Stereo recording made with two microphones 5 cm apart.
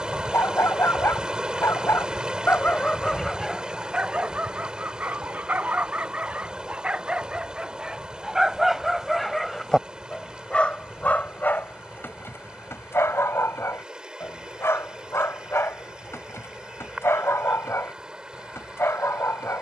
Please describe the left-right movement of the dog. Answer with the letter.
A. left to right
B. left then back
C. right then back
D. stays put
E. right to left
C.